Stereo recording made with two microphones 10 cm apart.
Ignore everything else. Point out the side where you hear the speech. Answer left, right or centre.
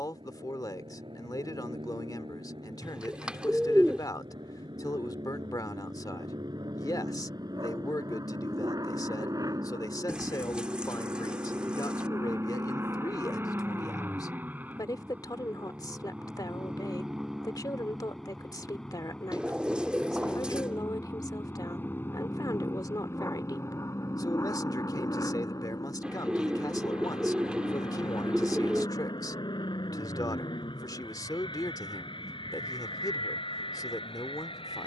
left.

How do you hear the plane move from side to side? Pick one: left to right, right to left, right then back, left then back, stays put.
right to left.